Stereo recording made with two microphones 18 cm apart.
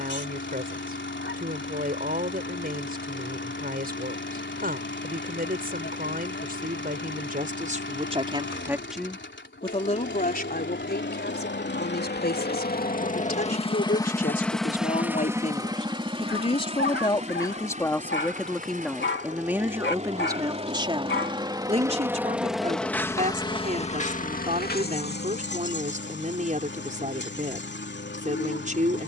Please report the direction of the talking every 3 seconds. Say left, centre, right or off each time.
right, right, right, left, left, left, centre, right, right, right.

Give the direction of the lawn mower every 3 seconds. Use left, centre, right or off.
left, left, left, left, left, right, right, centre, left, left.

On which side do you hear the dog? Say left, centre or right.
left.